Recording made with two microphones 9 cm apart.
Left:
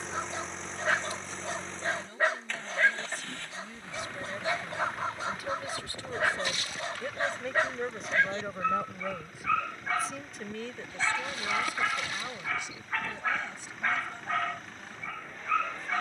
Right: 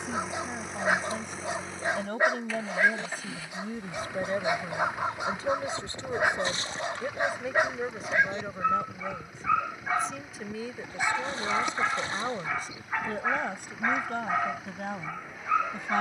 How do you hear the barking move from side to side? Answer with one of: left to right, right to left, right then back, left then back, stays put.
stays put.